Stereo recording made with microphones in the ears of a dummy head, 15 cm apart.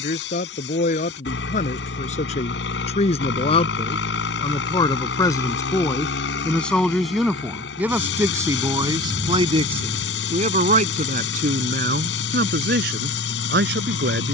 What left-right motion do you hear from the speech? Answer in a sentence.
You can hear the speech move to the right.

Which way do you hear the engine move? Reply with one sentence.
You can hear the engine stay put.